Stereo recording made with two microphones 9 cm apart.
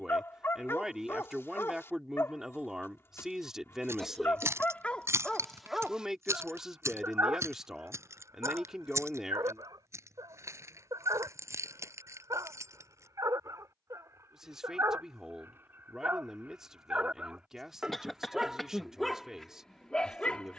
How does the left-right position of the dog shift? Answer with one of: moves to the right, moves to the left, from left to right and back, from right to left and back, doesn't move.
from left to right and back.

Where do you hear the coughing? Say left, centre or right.
centre.